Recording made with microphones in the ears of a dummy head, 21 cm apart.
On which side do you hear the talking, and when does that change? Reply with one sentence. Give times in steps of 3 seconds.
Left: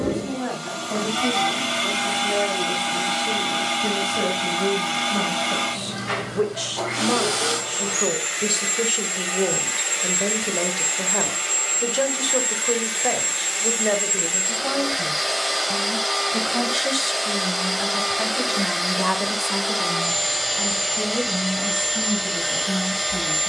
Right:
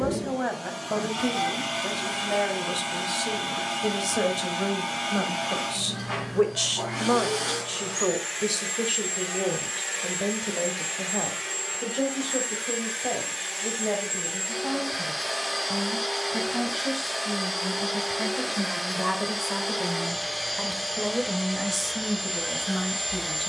You can hear the talking on the right from 0 s, in the centre from 6 s, on the left from 9 s, in the centre from 18 s and on the right from 21 s.